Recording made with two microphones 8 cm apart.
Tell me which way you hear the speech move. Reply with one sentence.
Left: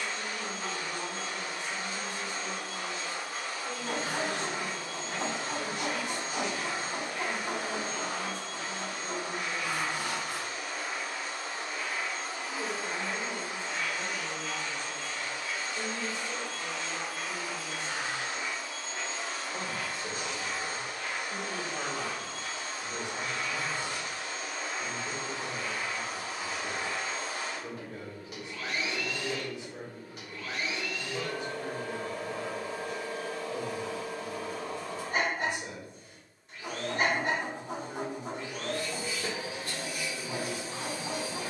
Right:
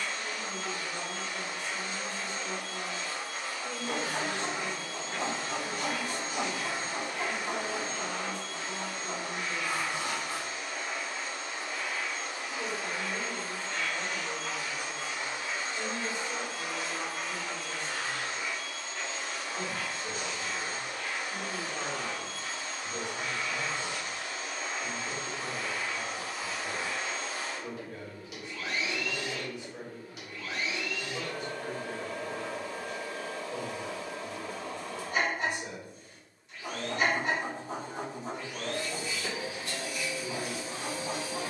In this clip you hear the speech stay put.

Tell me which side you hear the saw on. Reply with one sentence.
You can hear the saw on the left.